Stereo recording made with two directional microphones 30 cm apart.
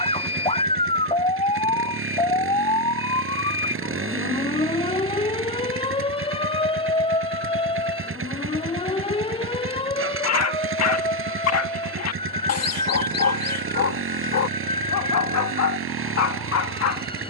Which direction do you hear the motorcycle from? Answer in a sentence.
In this clip you hear the motorcycle on the right.